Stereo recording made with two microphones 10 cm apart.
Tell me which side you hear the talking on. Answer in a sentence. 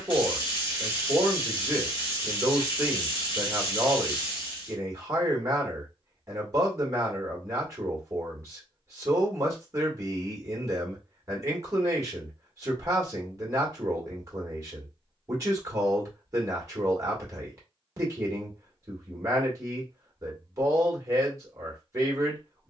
In this clip you hear the talking on the right.